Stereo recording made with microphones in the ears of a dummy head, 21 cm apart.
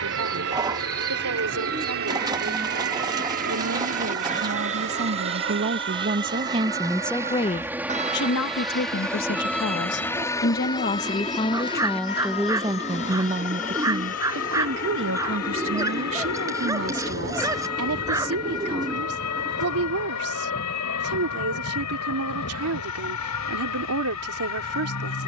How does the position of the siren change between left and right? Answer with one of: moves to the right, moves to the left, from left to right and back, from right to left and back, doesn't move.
moves to the left.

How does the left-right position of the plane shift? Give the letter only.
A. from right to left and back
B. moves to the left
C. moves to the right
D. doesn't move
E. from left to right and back
B.